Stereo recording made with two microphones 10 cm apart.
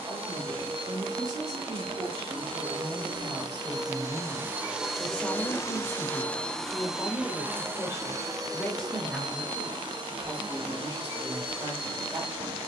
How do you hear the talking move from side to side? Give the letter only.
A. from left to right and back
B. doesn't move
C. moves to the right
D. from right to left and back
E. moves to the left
D.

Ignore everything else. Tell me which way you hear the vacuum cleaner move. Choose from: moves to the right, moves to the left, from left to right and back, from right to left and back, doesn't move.
from right to left and back.